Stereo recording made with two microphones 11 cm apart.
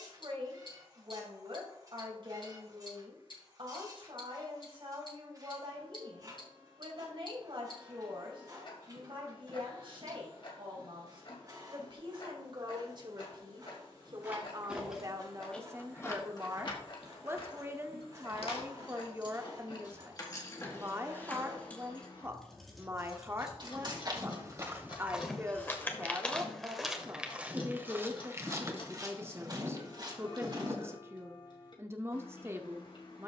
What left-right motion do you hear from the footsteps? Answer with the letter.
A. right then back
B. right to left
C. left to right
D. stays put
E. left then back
E.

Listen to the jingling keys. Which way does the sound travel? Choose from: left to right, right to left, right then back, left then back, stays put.
left then back.